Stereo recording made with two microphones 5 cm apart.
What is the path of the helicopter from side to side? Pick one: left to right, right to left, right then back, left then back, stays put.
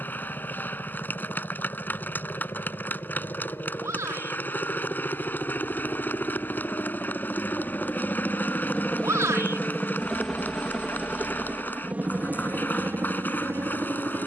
left to right.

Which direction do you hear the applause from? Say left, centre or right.
left.